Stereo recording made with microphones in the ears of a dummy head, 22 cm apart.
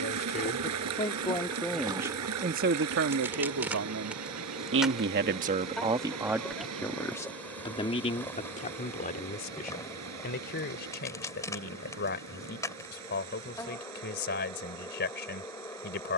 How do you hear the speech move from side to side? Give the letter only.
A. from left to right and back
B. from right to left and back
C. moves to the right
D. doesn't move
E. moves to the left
A.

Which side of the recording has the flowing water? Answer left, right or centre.
right.